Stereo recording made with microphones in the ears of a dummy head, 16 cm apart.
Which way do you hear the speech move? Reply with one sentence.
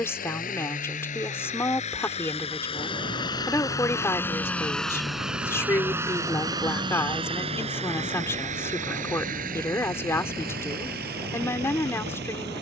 You can hear the speech stay put.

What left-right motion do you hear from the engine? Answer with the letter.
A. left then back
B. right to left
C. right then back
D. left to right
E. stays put
D.